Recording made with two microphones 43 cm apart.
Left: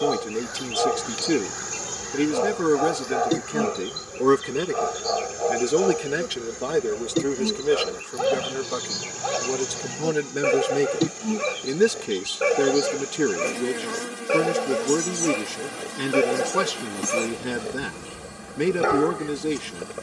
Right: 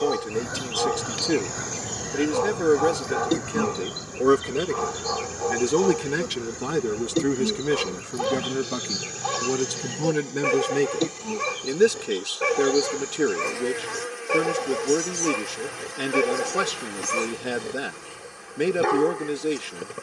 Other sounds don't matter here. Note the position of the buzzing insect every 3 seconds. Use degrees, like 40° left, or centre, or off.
30° left, 10° right, centre, 30° left, 50° left, 50° left, 50° left.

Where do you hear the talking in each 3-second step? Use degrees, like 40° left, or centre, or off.
20° left, centre, 30° right, 10° right, 10° left, 10° left, 10° left.